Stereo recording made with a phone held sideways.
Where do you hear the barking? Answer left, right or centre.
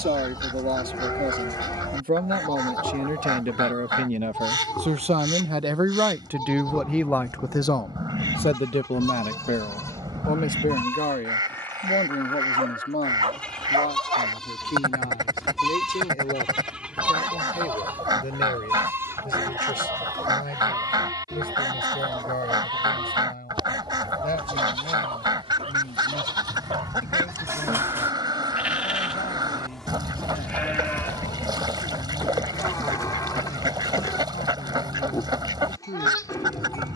right.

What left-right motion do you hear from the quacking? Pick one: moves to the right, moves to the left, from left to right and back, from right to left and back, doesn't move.
doesn't move.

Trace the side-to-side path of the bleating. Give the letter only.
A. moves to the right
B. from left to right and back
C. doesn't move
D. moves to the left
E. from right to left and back
B.